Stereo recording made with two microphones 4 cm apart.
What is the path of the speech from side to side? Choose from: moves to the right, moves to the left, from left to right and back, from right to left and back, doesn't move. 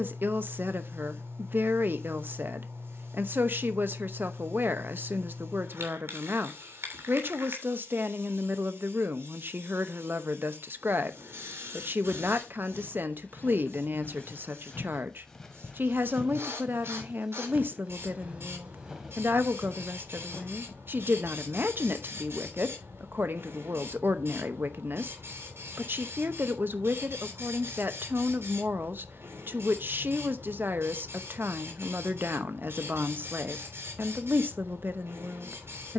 doesn't move.